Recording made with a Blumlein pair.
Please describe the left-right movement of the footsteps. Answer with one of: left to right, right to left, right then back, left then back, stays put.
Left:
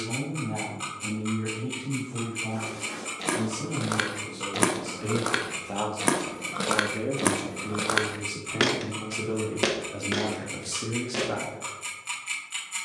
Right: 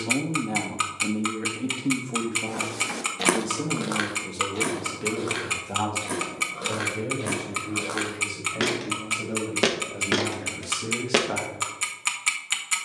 left then back.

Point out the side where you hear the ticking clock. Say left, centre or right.
right.